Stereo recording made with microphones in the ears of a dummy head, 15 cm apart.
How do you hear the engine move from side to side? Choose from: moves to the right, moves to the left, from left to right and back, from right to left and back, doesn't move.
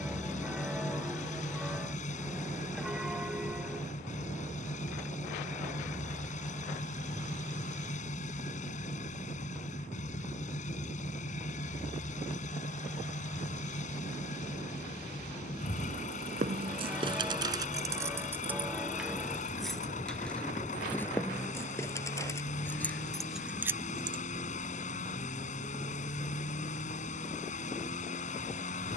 doesn't move.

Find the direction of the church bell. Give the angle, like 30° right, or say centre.
centre.